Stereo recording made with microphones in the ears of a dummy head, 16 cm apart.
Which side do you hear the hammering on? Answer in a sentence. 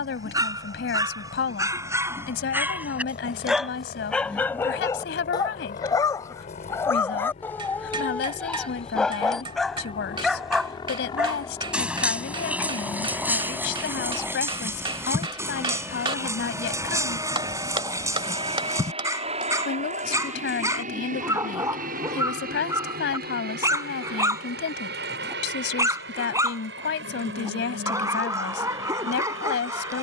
You can hear the hammering on the right.